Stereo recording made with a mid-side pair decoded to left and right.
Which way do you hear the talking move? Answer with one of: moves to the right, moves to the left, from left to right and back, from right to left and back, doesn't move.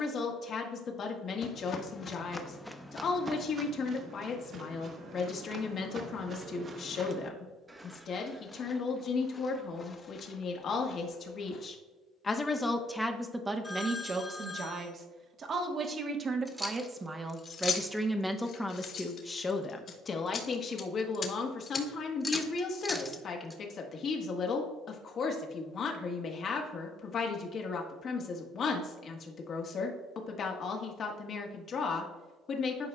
from left to right and back.